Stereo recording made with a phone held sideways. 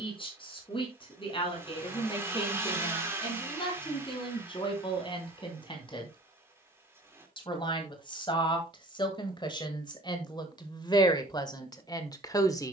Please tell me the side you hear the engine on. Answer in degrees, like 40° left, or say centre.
20° right.